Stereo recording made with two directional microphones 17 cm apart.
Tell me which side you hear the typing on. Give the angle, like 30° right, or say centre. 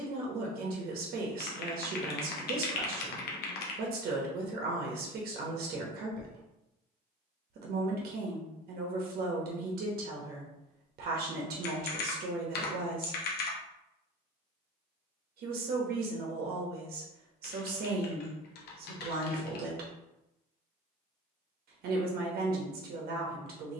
70° left.